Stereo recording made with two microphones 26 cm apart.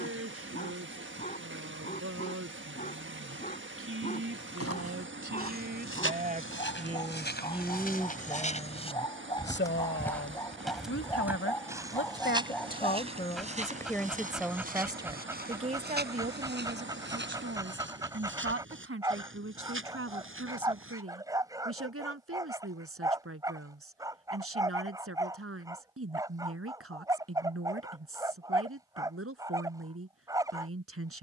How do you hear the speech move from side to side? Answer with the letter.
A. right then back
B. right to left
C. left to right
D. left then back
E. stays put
D.